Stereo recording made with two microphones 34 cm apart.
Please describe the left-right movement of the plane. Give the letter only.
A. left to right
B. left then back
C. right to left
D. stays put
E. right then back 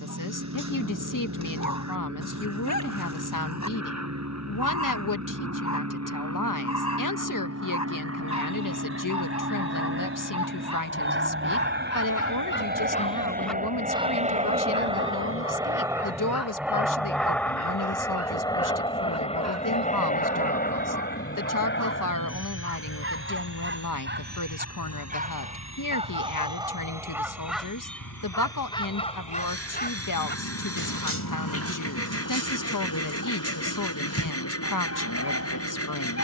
C.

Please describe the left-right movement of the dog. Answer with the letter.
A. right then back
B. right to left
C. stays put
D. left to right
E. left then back
A.